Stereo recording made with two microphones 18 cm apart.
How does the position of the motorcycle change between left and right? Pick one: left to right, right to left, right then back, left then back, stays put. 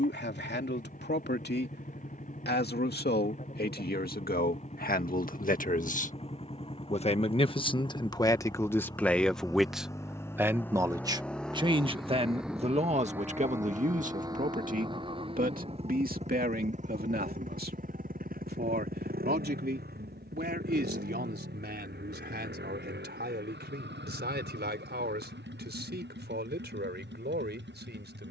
left to right.